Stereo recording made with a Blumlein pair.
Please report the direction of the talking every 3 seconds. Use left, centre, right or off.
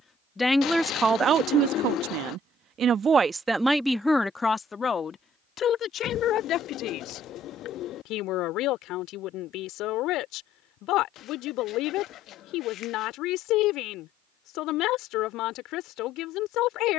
right, centre, left, left, left, left.